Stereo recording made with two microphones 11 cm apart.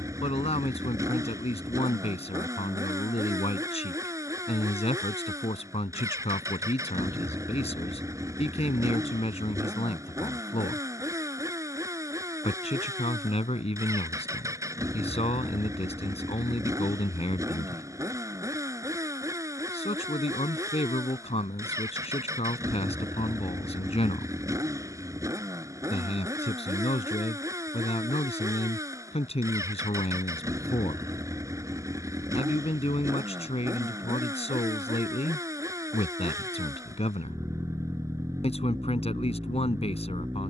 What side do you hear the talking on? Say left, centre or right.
left.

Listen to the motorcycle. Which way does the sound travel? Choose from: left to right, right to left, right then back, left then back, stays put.
stays put.